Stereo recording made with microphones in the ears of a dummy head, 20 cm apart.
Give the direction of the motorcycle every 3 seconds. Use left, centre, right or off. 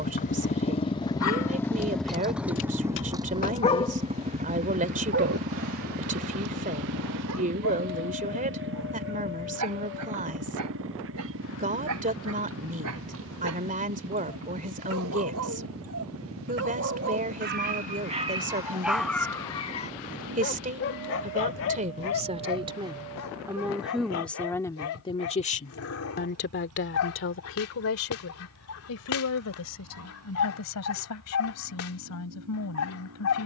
centre, right, right, right, right, right, right, right, right, right, right.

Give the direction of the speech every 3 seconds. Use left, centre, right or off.
right, right, right, right, right, right, right, right, left, left, left.